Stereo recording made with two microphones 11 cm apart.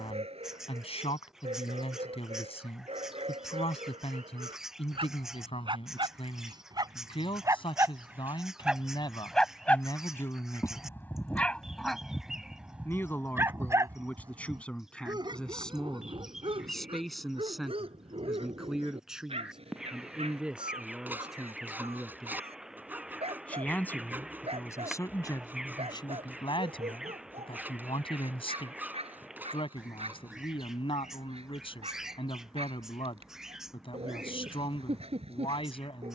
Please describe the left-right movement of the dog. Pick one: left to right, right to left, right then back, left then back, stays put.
left then back.